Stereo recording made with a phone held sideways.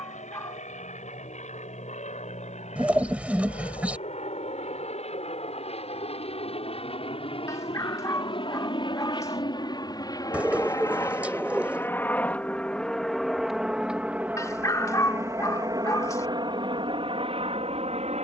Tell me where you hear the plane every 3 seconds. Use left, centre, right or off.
left, left, left, left, centre, right.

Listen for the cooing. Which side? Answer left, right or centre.
centre.